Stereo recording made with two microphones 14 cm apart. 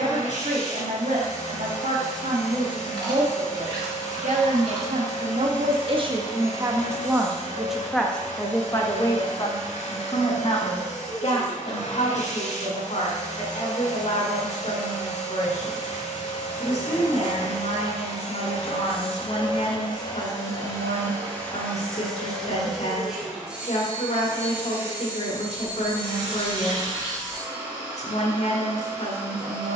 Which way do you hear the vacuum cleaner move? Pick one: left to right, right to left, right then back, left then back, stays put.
left to right.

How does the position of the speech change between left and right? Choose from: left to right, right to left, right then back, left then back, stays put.
right to left.